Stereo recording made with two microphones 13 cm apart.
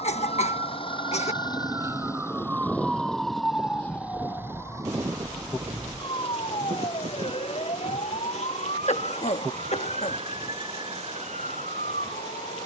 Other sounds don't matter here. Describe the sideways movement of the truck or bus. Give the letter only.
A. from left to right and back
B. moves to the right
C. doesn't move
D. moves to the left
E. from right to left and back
B.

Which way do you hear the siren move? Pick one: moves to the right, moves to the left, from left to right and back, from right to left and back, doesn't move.
moves to the left.